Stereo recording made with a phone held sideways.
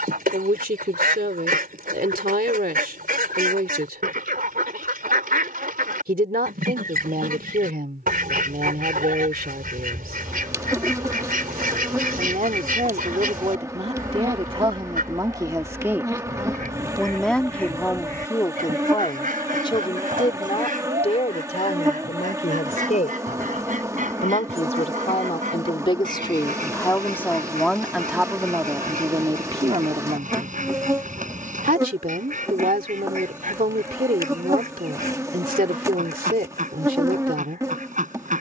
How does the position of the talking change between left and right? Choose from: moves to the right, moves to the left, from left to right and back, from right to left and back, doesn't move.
from right to left and back.